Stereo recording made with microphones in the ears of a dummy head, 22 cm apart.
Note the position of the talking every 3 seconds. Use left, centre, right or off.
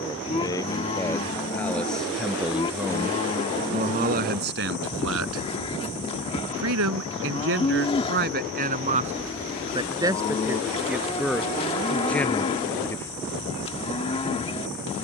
centre, right, right, centre, centre.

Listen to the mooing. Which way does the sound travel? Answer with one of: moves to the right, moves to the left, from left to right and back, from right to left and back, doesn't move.
doesn't move.